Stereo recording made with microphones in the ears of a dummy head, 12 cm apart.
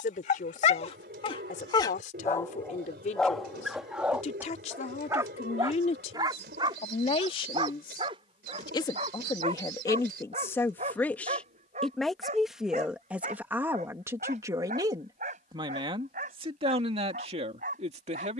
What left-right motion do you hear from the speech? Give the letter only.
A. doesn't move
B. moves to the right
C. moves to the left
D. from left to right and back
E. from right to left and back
B.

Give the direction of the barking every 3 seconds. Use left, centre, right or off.
left, centre, right, right, right, right.